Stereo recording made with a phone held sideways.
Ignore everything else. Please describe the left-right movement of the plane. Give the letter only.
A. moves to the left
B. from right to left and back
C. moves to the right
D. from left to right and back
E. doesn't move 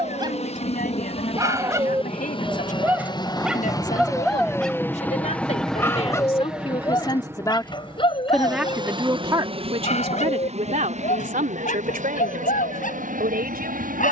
C.